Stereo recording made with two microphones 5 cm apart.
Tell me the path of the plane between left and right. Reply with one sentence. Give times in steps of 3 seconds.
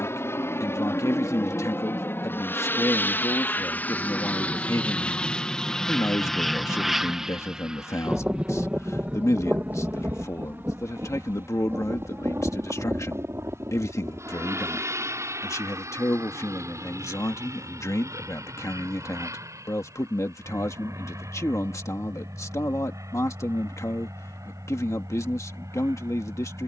In this clip you hear the plane on the left from 0 s, in the centre from 6 s and on the right from 9 s.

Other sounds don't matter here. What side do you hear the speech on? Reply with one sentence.
In this clip you hear the speech on the left.